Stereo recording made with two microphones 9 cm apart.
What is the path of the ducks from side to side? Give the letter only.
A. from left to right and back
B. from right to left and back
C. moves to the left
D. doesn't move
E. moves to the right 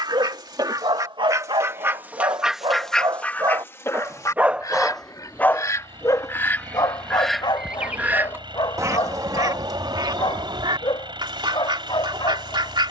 B.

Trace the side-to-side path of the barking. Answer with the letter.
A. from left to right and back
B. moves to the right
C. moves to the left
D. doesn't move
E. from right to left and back
C.